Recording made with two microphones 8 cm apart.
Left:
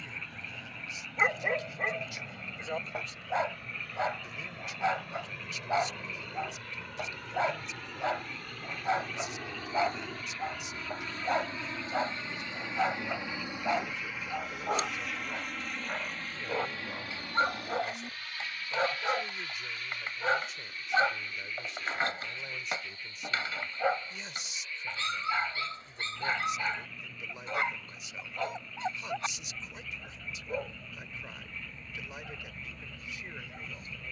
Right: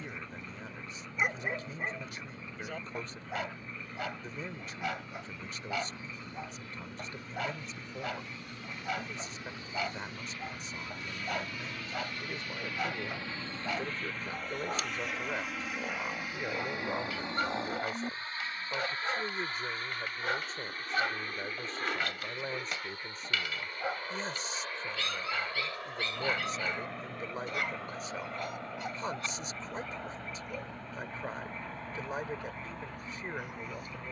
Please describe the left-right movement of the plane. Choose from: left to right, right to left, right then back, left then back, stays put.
left to right.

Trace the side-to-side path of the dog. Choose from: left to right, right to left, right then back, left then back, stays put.
stays put.